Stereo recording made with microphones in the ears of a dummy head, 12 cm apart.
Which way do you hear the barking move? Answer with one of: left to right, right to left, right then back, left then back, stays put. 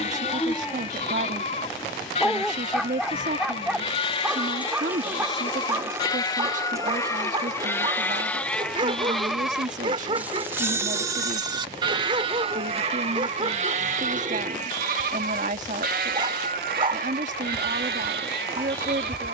left to right.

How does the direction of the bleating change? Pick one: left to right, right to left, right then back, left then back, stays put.
left to right.